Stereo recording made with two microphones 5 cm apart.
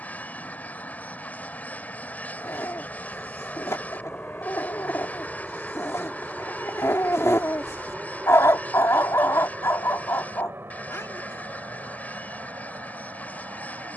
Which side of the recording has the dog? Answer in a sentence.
You can hear the dog on the left.